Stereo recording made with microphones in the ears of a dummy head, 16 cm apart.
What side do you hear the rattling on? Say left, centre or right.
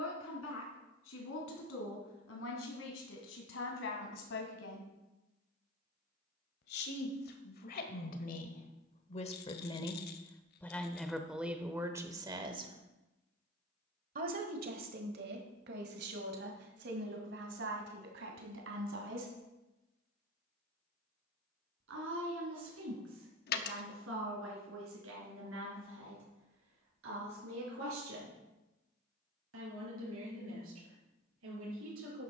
left.